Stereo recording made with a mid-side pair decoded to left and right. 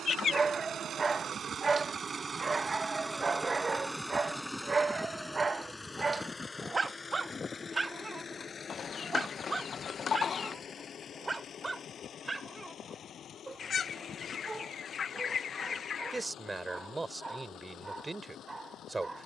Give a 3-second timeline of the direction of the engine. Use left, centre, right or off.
right, centre, left, left, left, left, left.